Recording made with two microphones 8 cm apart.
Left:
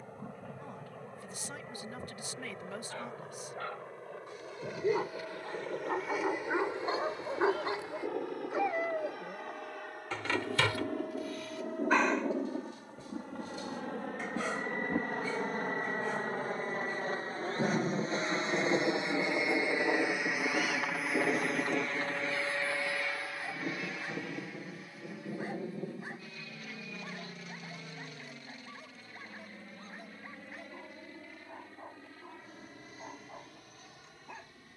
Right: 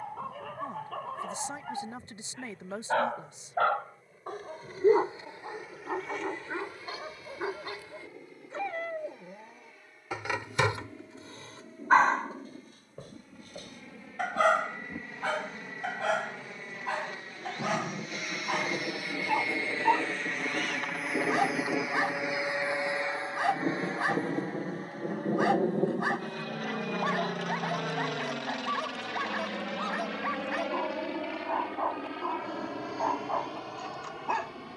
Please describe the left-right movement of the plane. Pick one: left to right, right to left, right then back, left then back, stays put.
left to right.